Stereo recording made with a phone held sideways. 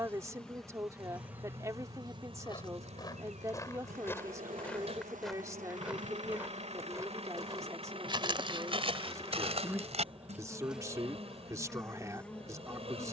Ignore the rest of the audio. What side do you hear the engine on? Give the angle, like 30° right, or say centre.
50° right.